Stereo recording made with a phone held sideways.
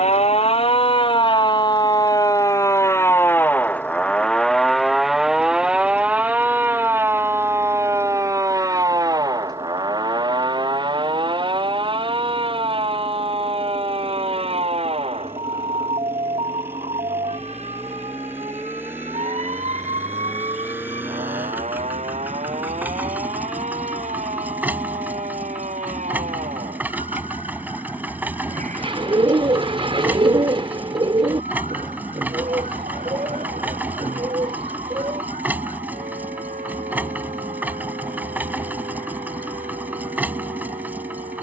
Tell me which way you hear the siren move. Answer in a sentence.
You can hear the siren move from left to right.